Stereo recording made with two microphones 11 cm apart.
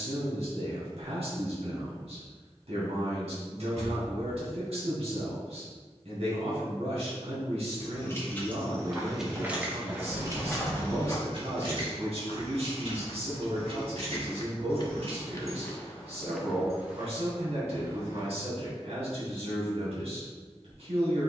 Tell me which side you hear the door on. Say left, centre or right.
right.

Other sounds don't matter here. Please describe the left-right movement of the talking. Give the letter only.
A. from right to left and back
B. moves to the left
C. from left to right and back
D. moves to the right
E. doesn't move
E.